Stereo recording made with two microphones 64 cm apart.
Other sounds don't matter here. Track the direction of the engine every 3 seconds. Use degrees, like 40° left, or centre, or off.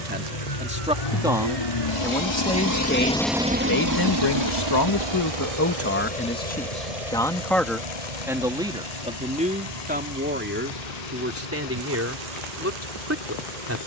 60° left, 40° right, 70° right, 80° right, 80° right.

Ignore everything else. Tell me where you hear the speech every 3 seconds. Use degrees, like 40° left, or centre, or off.
centre, 30° left, centre, 20° right, 20° right.